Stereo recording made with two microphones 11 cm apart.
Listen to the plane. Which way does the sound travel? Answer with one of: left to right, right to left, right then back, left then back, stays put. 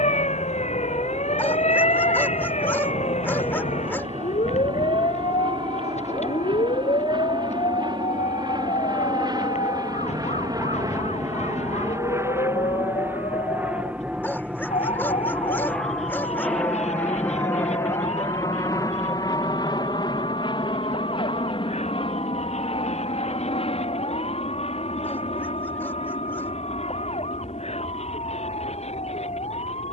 right to left.